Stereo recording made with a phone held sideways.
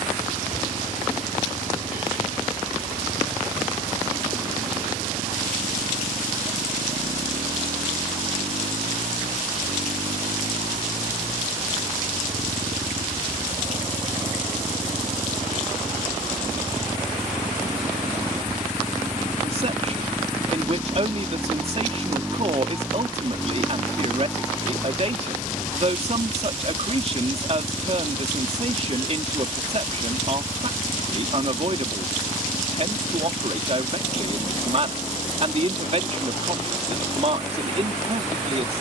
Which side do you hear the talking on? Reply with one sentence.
In this clip you hear the talking on the right.